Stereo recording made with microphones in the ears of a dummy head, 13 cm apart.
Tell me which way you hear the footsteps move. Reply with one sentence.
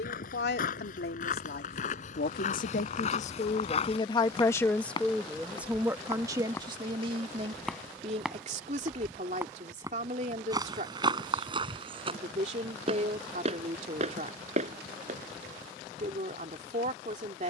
In this clip you hear the footsteps move to the right.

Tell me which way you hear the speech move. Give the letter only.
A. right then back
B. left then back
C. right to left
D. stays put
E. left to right
E.